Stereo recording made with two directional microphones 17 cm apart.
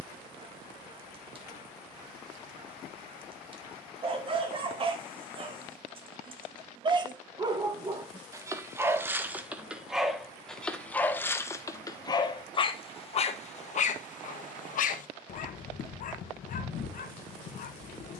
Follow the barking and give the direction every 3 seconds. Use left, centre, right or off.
right, right, right, centre, left, left.